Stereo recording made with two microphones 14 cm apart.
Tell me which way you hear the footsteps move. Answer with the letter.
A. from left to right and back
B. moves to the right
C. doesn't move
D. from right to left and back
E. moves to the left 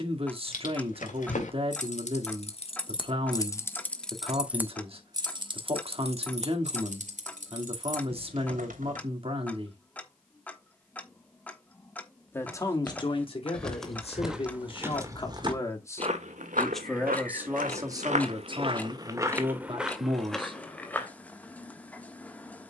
A.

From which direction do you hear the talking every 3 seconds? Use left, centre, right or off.
right, right, right, right, left, centre, right, off.